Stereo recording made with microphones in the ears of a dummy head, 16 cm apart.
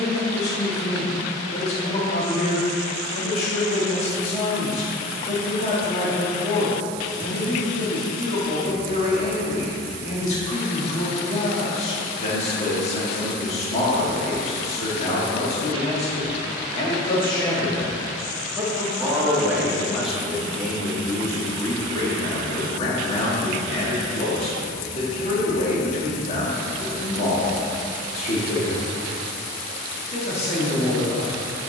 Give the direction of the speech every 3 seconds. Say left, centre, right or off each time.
left, left, left, left, left, left, centre, left, left, left, left.